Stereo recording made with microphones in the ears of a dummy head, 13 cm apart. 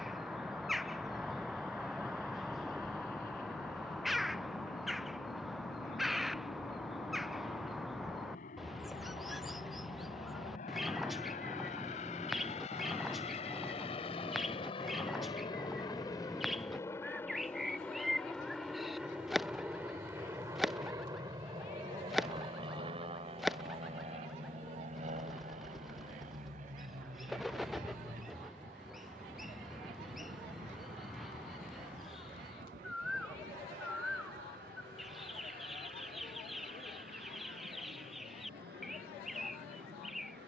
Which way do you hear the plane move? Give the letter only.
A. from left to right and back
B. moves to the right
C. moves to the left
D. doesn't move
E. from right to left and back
B.